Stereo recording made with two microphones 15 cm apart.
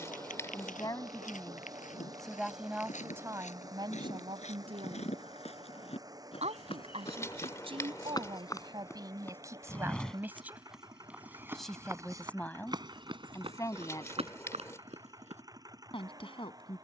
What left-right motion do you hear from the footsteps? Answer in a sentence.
You can hear the footsteps travel towards the right.